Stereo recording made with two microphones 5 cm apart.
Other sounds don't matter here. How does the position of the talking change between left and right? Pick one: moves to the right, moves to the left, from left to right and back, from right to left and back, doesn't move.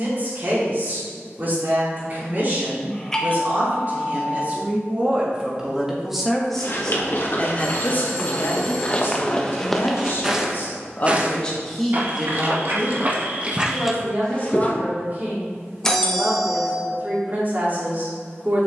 from right to left and back.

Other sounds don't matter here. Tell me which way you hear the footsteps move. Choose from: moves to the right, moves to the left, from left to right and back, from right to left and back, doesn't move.
from left to right and back.